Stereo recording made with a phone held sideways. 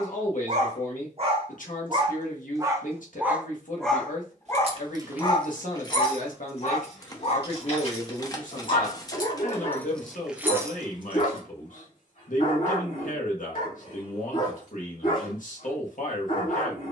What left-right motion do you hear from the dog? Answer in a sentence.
In this clip you hear the dog go from the right side to the left.